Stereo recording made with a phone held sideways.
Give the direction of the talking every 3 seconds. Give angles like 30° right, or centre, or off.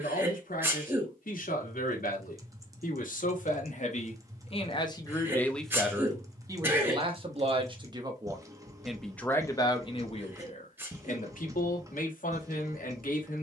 70° left, 40° left, 30° right, 40° left, 70° left.